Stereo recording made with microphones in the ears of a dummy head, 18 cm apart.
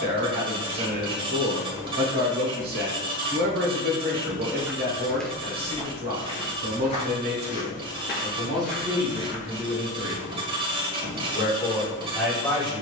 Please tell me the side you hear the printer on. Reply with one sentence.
You can hear the printer on the right.